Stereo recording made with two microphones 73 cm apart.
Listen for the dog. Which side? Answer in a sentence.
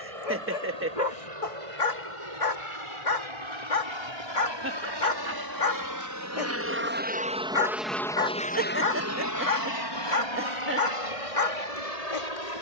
You can hear the dog on the left.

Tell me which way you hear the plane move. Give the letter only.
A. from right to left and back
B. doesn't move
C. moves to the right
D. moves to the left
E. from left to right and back
D.